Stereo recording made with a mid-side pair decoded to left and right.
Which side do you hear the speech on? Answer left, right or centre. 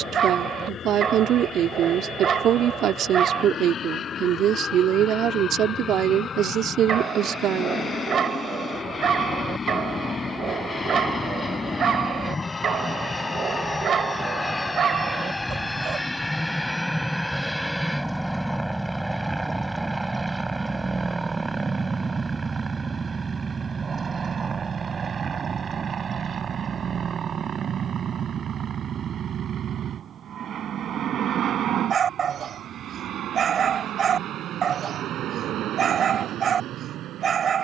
right.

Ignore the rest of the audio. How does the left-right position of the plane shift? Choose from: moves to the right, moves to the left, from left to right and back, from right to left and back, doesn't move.
moves to the right.